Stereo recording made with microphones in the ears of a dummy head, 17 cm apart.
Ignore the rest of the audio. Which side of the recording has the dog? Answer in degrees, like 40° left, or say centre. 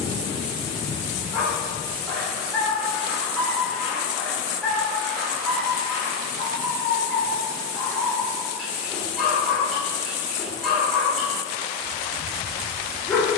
centre.